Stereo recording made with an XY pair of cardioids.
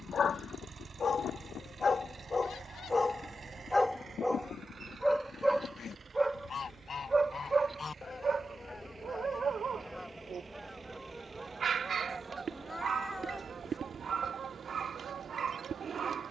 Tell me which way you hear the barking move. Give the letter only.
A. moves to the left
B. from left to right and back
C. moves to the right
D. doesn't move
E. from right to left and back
C.